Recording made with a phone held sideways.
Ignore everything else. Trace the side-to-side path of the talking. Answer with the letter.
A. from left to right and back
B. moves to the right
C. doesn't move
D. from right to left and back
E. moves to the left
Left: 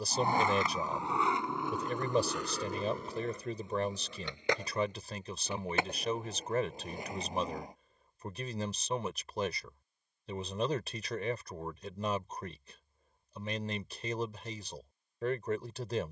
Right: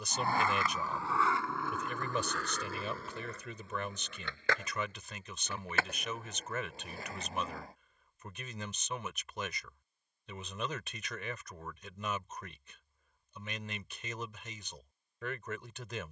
C.